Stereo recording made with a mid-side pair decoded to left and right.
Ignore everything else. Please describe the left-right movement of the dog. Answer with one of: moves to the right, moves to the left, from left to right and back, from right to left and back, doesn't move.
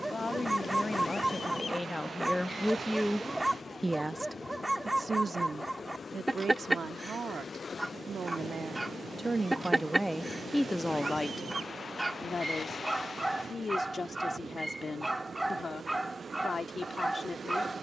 doesn't move.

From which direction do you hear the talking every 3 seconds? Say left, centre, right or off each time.
left, right, right, centre, left, left.